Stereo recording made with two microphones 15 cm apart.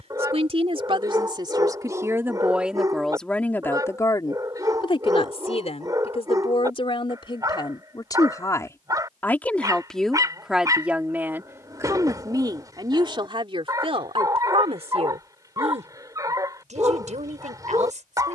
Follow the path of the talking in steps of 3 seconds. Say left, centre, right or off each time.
right, left, left, centre, right, right.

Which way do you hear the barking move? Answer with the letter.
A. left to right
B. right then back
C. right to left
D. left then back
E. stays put
E.